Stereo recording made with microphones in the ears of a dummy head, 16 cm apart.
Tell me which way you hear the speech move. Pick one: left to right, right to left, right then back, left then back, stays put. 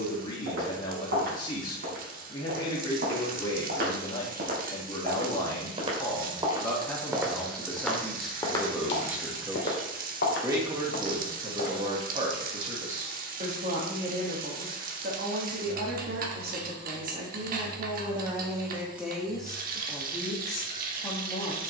right then back.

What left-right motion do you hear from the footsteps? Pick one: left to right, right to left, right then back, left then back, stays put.
right to left.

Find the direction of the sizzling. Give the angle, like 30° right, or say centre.
50° right.